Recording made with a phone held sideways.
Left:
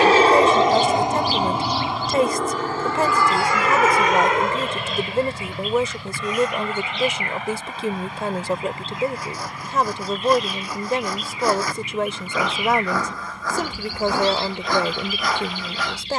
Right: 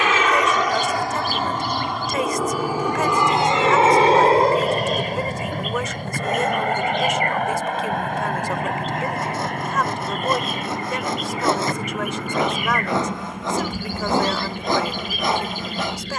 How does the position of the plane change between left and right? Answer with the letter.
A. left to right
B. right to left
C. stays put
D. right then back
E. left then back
A.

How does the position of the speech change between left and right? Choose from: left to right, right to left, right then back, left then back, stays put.
stays put.